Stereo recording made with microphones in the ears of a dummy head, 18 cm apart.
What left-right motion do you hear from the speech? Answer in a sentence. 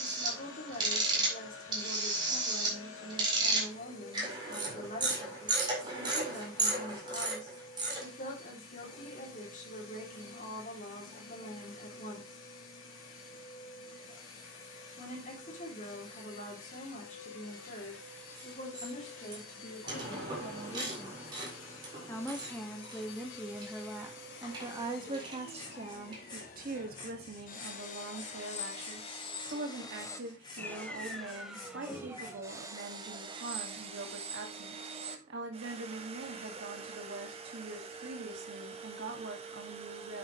You can hear the speech move to the right.